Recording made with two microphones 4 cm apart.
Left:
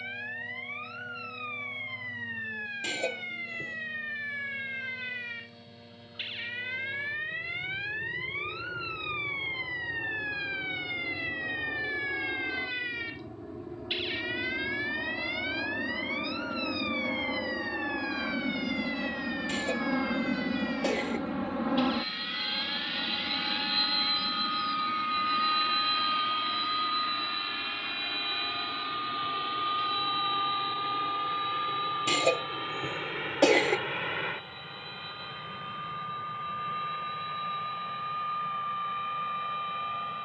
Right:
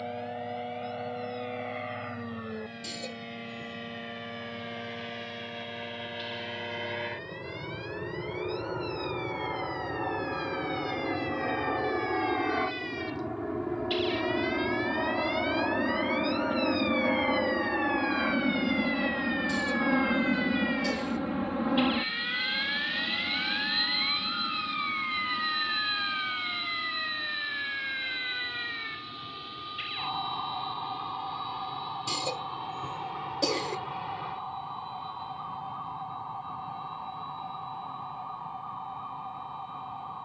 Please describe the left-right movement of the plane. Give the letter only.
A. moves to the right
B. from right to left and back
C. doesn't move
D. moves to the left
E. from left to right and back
D.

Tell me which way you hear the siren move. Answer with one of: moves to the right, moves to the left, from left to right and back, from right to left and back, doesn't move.
moves to the right.